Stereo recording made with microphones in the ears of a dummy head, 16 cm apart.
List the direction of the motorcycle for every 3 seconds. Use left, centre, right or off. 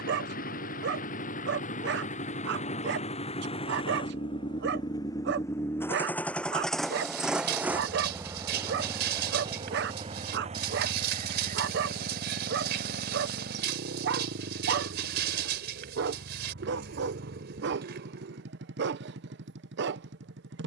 left, left, centre, right, right, right, right.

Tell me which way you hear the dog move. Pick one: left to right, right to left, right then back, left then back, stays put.
stays put.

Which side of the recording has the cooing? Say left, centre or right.
right.